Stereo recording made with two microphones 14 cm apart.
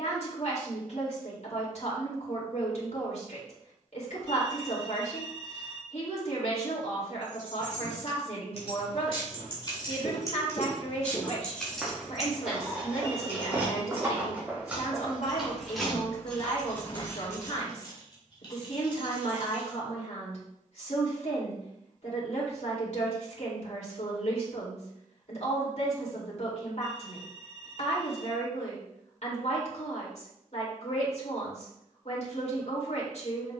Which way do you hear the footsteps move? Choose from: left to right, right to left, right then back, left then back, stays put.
right then back.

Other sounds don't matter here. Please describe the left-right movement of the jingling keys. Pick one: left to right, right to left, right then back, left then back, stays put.
right then back.